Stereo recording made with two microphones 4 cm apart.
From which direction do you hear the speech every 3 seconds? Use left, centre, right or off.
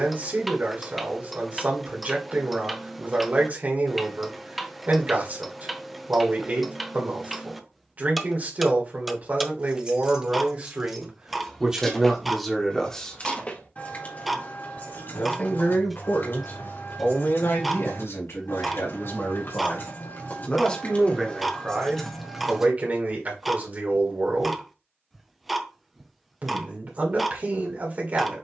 right, right, right, right, centre, left, left, right, right, right.